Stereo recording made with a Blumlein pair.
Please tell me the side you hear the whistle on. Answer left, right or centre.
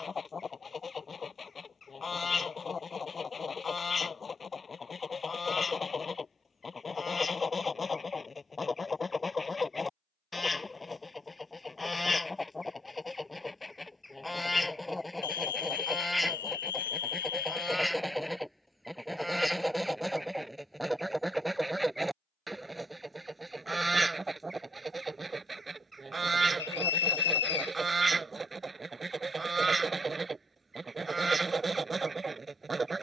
left.